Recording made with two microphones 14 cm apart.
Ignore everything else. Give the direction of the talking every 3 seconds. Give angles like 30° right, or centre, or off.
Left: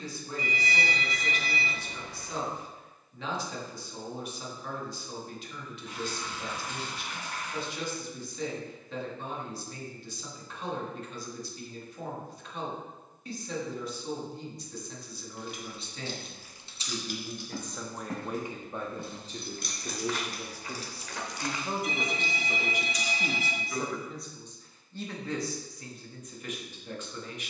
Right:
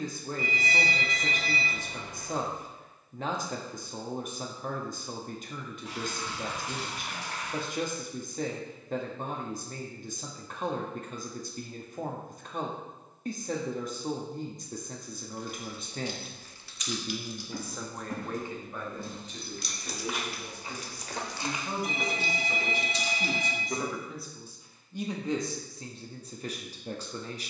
50° right, 50° right, 50° right, 50° right, 50° right, 30° right, 30° left, 20° left, 20° right.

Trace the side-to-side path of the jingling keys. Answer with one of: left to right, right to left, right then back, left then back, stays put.
left then back.